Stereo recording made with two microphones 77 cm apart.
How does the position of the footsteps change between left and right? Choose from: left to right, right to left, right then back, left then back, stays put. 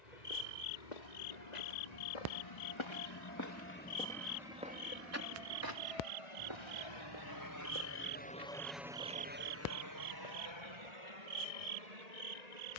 left to right.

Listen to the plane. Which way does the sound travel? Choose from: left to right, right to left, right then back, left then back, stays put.
left to right.